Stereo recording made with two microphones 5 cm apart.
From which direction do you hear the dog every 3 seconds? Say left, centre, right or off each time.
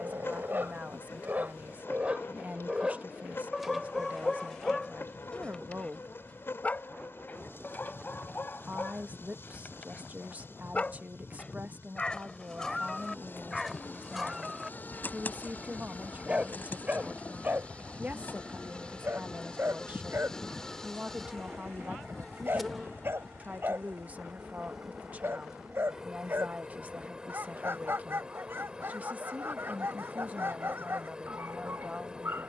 right, centre, left, left, centre, right, right, right, right, right, right.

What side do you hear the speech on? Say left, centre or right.
right.